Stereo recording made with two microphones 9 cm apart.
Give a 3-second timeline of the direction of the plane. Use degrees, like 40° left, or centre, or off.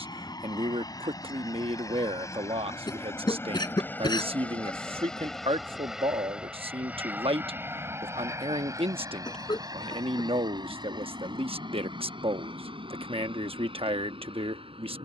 40° left, 10° left, 20° right, 40° right, 60° right.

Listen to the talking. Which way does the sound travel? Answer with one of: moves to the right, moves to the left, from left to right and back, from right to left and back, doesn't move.
doesn't move.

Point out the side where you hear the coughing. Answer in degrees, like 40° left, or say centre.
50° left.